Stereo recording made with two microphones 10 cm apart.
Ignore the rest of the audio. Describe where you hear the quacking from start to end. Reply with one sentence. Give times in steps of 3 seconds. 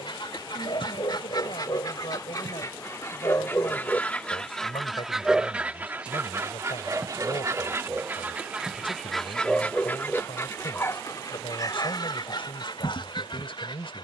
In this clip you hear the quacking on the left from 0 s, in the centre from 3 s, on the right from 6 s and on the left from 9 s.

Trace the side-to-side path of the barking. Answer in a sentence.
You can hear the barking go right and come back.